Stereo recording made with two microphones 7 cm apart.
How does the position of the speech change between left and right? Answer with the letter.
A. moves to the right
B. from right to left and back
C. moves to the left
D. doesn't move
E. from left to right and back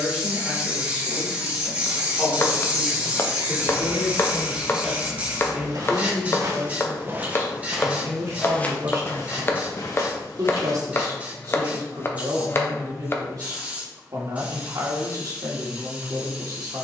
A.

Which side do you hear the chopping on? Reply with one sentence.
In this clip you hear the chopping on the left.